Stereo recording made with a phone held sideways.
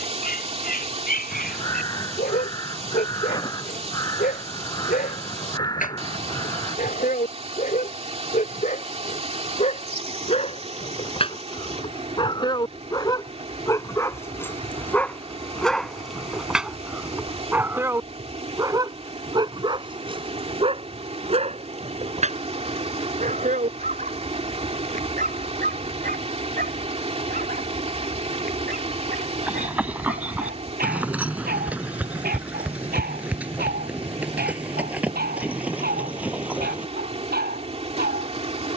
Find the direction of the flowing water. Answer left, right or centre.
right.